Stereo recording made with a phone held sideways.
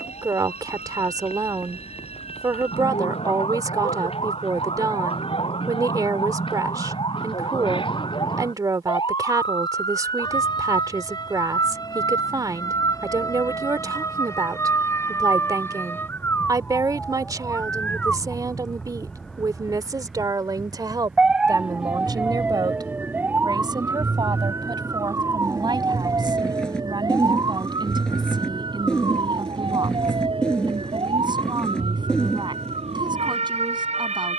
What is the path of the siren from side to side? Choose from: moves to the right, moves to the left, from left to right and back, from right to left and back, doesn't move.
moves to the right.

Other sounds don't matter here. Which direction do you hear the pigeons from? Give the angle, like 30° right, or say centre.
10° left.